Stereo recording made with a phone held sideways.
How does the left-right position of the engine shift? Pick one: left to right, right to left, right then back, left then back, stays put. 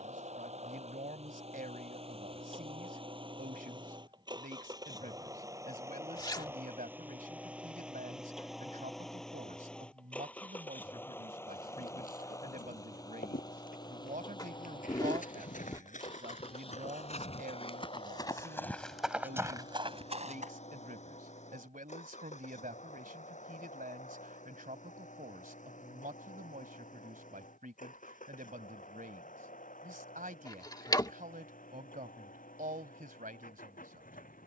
right to left.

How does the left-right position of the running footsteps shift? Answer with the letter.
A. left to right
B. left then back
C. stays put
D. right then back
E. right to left
A.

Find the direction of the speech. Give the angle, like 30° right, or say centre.
70° right.